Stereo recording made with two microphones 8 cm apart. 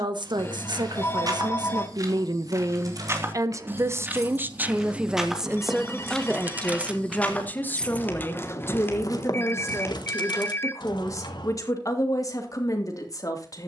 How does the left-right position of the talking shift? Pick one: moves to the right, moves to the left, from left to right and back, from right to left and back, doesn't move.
moves to the left.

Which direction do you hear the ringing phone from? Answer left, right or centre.
left.